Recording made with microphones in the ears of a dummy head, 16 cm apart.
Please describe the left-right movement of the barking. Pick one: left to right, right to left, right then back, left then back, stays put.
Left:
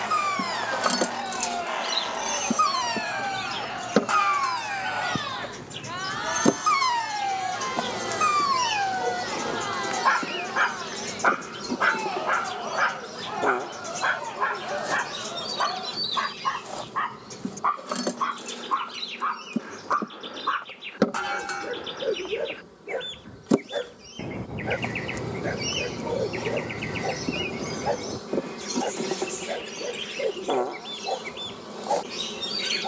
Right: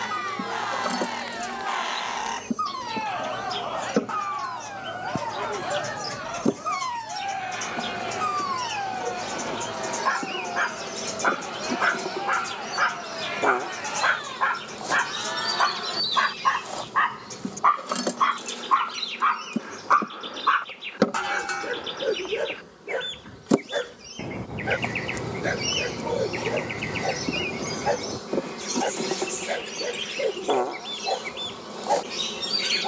left to right.